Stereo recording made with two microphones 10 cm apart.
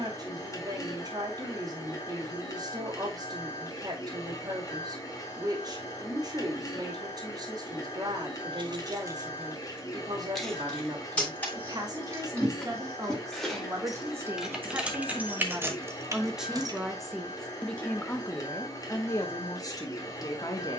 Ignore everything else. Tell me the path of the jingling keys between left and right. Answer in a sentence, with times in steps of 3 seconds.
You can hear the jingling keys not at all from 0 s, on the right from 6 s, in the centre from 9 s, on the right from 15 s and not at all from 18 s.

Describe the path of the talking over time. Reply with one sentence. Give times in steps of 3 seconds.
You can hear the talking on the right from 0 s, in the centre from 15 s and on the left from 18 s.